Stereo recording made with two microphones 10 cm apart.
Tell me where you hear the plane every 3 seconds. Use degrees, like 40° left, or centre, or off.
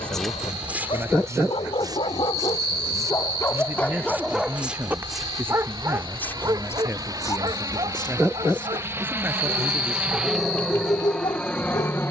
50° right, 50° right, 40° right, centre.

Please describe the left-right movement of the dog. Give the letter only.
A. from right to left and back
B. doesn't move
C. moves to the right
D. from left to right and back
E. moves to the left
D.